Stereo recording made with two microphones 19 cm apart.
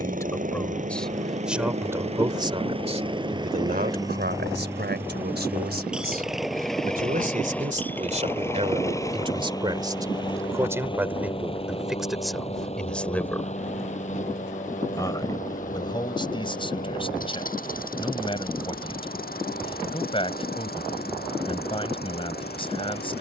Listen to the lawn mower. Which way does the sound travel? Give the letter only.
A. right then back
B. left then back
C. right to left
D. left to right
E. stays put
C.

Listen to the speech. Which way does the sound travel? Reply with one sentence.
You can hear the speech go right and come back.